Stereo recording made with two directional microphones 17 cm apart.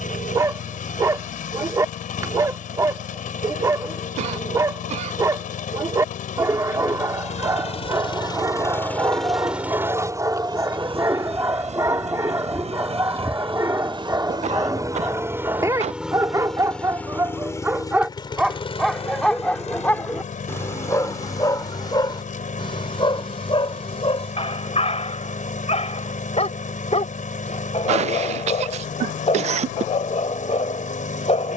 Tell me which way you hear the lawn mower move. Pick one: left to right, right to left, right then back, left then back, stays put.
right then back.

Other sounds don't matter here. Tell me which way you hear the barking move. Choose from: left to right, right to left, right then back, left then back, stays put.
right to left.